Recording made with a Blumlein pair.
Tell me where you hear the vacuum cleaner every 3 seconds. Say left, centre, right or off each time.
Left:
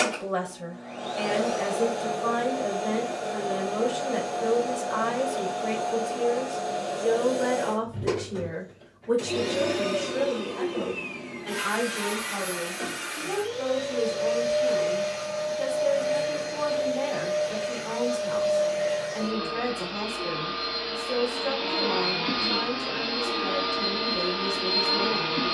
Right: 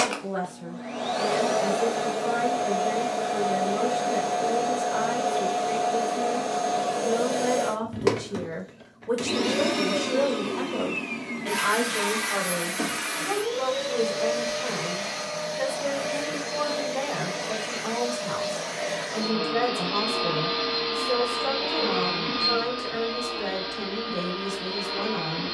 right, right, right, right, right, right, right, centre, left.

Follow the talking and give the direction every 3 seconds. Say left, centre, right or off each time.
left, left, centre, right, right, right, right, right, right.